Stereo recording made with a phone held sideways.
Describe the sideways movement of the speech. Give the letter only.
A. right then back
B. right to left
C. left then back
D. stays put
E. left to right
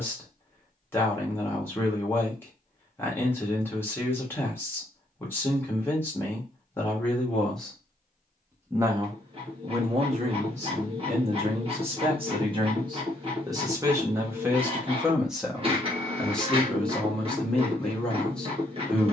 A.